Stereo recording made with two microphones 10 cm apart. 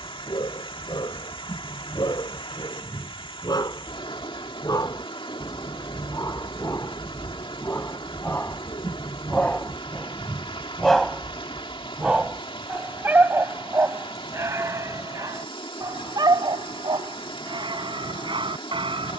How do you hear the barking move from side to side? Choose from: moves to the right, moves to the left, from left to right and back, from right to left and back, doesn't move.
moves to the right.